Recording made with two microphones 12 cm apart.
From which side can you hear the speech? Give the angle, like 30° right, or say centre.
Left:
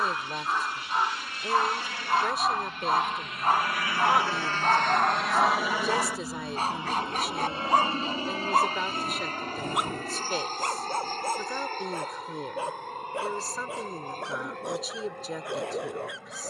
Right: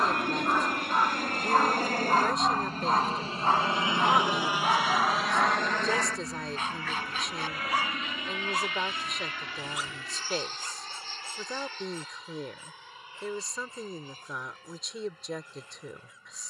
centre.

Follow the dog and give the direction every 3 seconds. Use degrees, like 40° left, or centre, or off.
10° right, 20° left, 40° left, 60° left, 80° left, 80° left.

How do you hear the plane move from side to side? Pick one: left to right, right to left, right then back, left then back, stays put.
right to left.